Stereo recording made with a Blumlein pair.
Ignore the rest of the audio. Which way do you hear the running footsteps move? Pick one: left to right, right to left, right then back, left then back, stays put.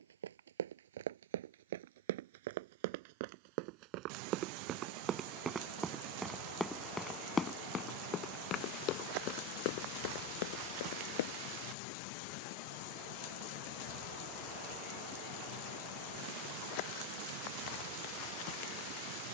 right to left.